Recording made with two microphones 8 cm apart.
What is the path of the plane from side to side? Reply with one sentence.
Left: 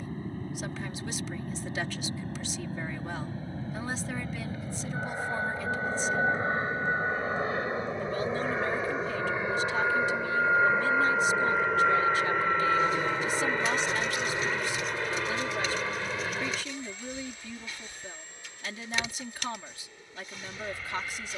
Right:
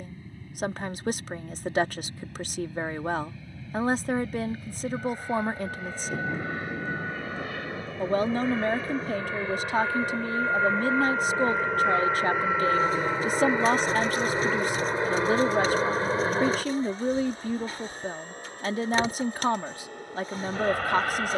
You can hear the plane travel towards the right.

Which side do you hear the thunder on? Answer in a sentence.
You can hear the thunder on the right.